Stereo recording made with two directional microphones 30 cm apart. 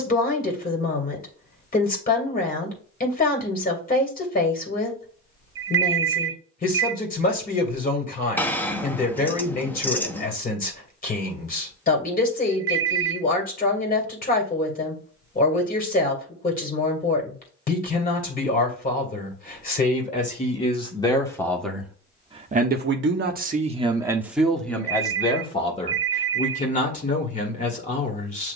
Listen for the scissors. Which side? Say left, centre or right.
centre.